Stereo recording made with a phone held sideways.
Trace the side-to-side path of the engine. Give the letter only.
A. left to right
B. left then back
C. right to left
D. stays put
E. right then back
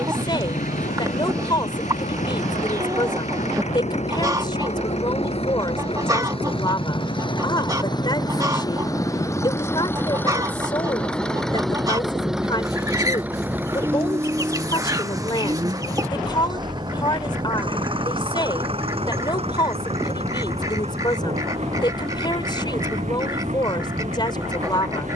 A.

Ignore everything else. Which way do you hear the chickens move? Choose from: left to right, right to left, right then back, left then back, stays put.
stays put.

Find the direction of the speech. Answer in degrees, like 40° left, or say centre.
30° left.